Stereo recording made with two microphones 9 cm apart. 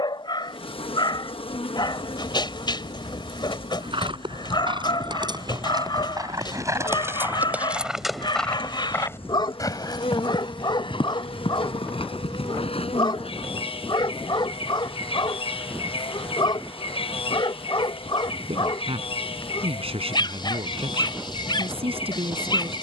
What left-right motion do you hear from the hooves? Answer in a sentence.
You can hear the hooves move from right to left.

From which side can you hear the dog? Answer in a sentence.
In this clip you hear the dog on the left.